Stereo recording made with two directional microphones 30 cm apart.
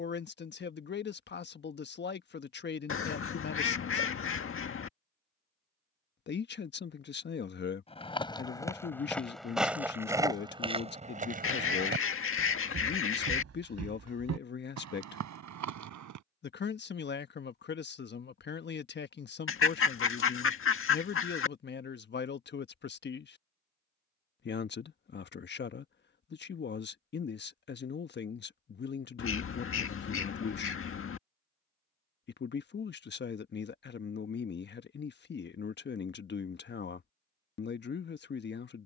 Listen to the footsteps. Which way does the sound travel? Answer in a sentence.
You can hear the footsteps go from the left side to the right.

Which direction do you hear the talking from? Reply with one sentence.
In this clip you hear the talking on the left.